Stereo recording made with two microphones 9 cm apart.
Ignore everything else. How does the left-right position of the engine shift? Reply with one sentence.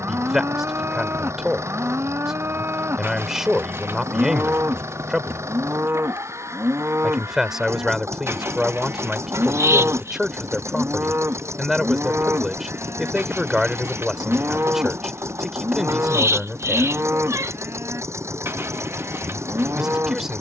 In this clip you hear the engine stay in one place.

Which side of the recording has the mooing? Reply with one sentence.
In this clip you hear the mooing on the right.